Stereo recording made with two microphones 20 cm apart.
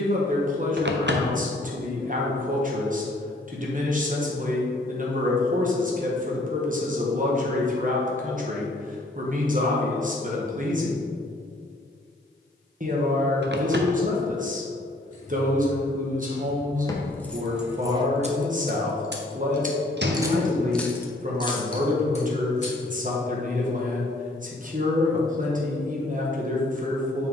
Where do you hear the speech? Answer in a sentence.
In this clip you hear the speech on the right.